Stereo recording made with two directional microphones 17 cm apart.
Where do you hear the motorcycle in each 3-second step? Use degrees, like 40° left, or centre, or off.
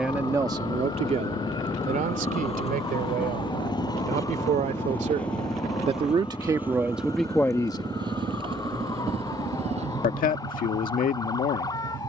40° left, 20° left, 20° right, 40° right.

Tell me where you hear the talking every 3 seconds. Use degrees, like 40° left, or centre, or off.
40° right, 50° right, centre, 60° left.